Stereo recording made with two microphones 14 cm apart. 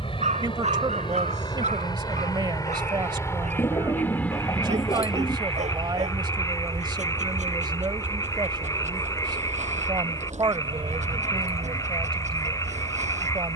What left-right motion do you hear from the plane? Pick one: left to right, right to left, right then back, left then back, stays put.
left to right.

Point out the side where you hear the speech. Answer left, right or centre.
right.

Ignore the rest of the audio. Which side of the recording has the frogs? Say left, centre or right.
left.